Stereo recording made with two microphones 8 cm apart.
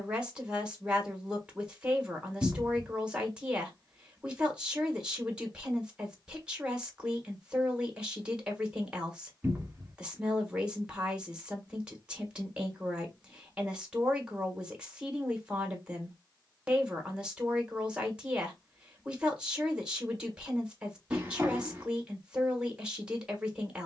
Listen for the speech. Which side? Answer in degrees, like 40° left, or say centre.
10° right.